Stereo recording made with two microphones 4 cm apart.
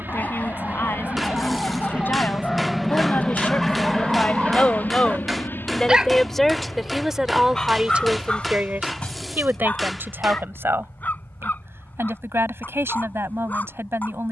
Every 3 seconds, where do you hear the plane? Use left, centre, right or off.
right, left, left, left, left.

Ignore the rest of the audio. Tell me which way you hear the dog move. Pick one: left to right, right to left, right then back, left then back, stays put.
right then back.